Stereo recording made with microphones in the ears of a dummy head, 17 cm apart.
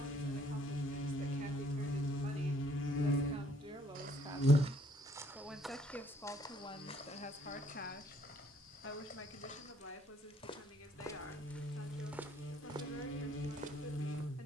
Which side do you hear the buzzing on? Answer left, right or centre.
left.